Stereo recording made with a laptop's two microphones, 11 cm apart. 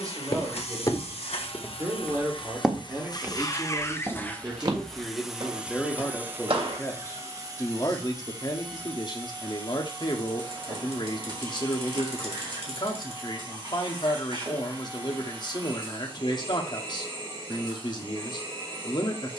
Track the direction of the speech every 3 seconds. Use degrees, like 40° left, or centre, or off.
30° right, 10° right, 30° left, 40° left, 40° left, 40° left, 40° left.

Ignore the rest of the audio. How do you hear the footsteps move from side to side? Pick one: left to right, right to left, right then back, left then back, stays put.
left to right.